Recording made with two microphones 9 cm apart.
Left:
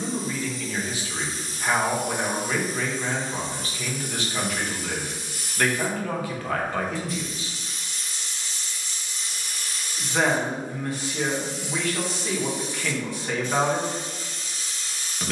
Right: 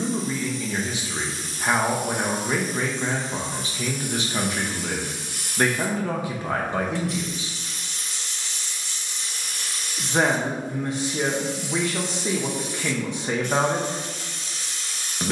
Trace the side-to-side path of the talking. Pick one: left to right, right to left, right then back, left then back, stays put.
stays put.